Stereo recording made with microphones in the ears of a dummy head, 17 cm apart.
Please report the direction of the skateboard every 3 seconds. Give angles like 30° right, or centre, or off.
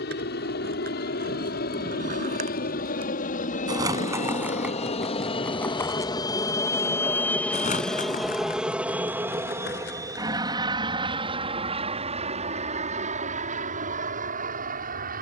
40° right, 10° right, 30° left, 50° left, off.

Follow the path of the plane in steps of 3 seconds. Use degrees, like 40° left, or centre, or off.
60° left, 40° left, 10° left, 20° right, 40° right.